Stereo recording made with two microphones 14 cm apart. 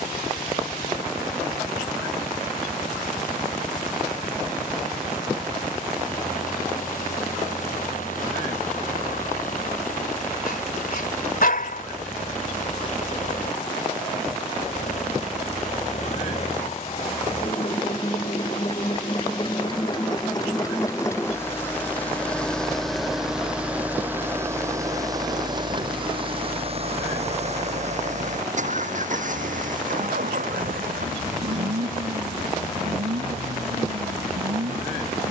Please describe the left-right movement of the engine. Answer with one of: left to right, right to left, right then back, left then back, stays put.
left to right.